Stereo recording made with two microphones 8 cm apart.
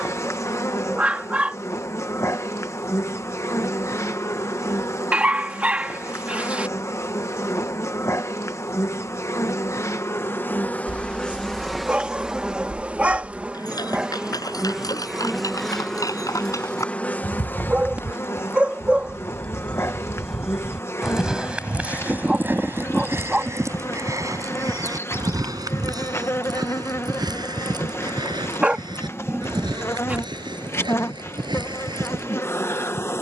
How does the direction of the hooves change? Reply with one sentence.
You can hear the hooves travel towards the right.